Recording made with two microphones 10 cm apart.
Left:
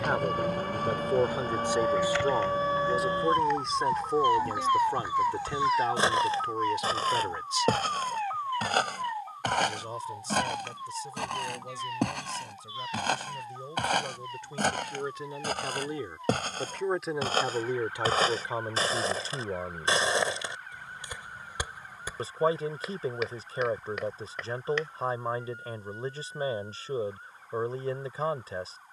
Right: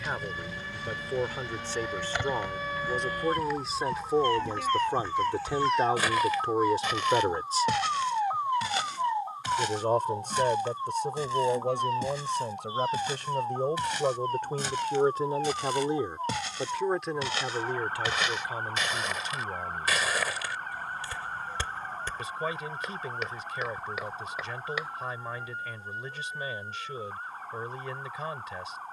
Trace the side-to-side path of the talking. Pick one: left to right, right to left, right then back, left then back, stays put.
right then back.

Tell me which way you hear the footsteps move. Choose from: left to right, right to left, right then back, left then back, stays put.
left then back.